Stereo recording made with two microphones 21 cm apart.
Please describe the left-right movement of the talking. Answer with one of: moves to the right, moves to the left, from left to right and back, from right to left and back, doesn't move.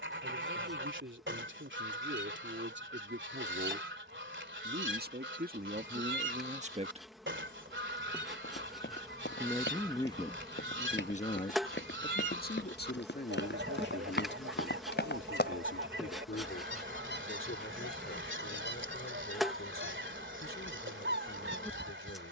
moves to the left.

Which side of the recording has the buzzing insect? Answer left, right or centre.
centre.